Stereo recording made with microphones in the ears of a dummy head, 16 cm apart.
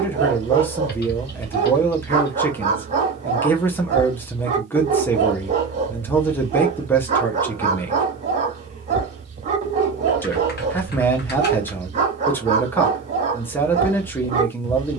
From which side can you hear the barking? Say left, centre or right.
right.